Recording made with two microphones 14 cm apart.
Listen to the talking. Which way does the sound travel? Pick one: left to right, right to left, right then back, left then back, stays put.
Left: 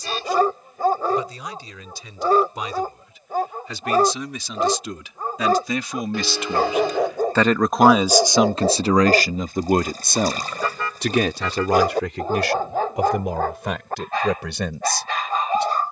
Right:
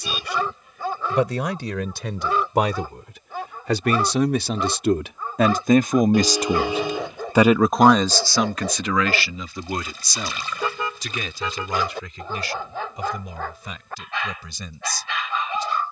right to left.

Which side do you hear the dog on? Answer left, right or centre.
left.